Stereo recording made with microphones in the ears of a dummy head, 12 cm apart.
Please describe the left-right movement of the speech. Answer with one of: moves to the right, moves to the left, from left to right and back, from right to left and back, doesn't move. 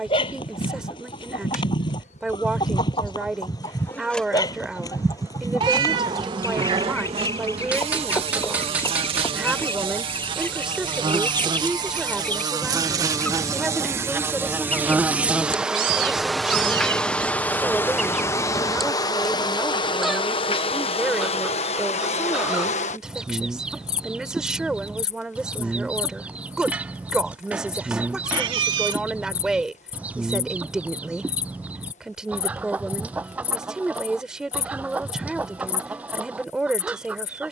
doesn't move.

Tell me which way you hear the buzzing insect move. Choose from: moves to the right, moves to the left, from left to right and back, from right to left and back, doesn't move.
from left to right and back.